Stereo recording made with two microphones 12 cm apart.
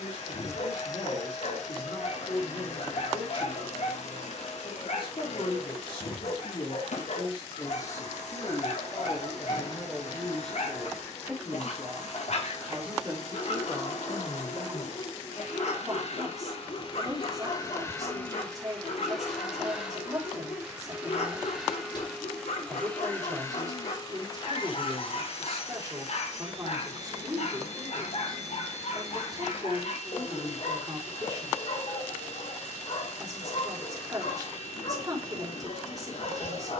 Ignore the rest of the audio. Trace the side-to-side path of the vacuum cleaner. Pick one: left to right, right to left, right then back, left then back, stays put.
right then back.